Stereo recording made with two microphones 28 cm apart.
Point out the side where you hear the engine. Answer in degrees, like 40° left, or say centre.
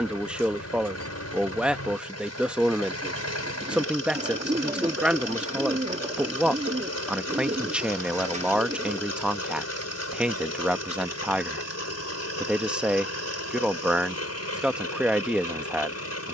70° left.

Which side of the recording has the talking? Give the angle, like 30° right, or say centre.
centre.